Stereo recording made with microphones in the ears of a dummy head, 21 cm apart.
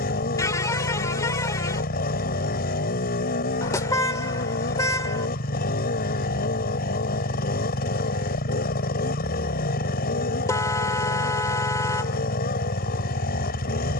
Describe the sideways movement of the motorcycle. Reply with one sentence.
In this clip you hear the motorcycle stay in one place.